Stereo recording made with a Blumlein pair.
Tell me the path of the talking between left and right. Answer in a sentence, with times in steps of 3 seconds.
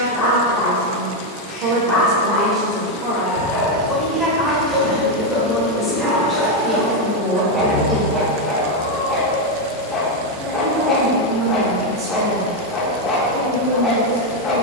In this clip you hear the talking on the right from 0 s, in the centre from 3 s and on the right from 9 s.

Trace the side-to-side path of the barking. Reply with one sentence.
In this clip you hear the barking move from left to right and back again.